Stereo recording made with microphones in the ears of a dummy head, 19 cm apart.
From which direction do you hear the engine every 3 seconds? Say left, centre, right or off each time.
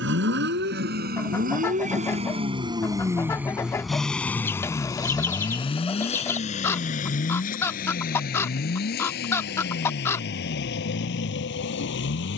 right, centre, left, left.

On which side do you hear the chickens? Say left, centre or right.
centre.